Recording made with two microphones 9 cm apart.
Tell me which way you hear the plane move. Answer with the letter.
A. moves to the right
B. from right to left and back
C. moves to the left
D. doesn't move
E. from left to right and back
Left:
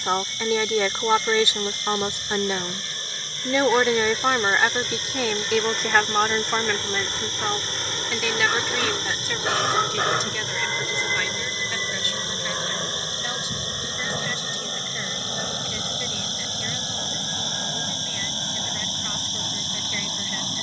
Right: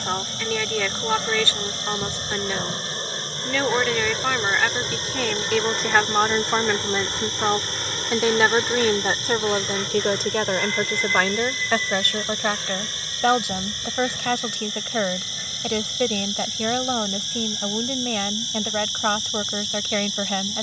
C.